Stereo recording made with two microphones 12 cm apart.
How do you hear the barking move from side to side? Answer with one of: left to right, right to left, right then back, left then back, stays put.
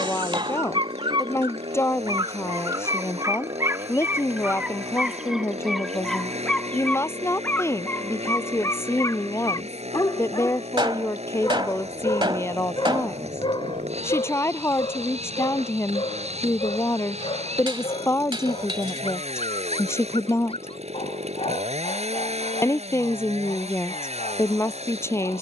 right to left.